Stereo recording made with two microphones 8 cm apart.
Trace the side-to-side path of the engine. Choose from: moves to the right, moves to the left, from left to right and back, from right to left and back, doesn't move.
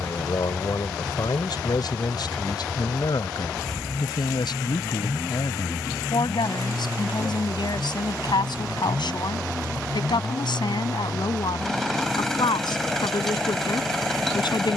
doesn't move.